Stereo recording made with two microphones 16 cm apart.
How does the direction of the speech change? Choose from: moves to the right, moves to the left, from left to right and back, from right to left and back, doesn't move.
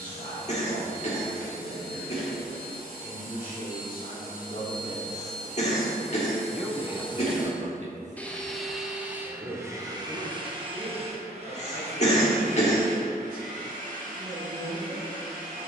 moves to the right.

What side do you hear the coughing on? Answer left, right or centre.
left.